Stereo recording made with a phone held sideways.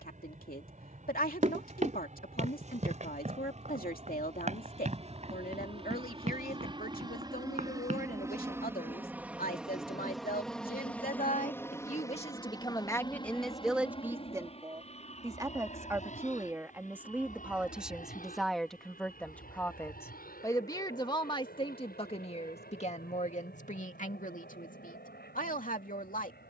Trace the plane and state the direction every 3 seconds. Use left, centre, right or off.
right, right, right, centre, left, left, left, left, left.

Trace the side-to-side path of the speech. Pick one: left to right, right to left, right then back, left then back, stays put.
right then back.